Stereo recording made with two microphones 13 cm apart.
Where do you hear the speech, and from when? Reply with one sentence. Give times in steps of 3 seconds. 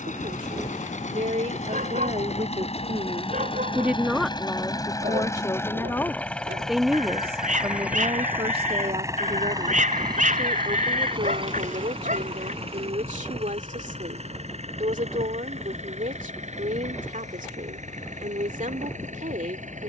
You can hear the speech on the right from 0 s, in the centre from 3 s and on the right from 6 s.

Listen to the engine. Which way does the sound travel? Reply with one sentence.
In this clip you hear the engine move from left to right.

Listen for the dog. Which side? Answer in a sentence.
In this clip you hear the dog on the right.